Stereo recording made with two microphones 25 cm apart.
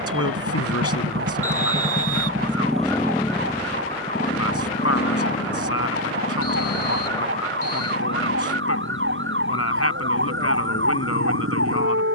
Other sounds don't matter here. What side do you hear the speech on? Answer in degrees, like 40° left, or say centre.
70° left.